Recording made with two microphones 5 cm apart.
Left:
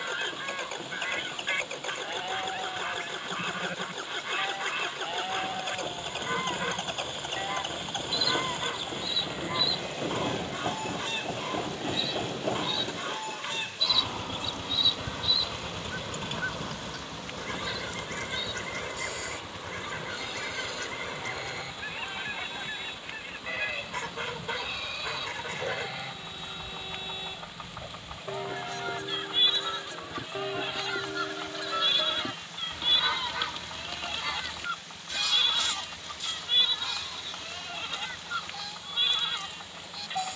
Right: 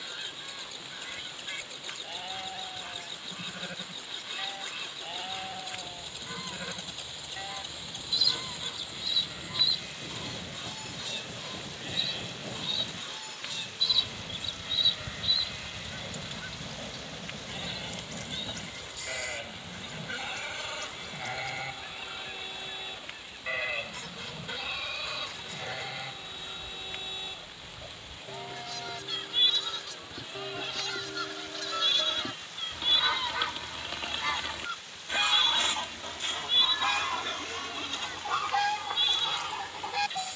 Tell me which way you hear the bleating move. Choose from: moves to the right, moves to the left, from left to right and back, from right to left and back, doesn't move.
from left to right and back.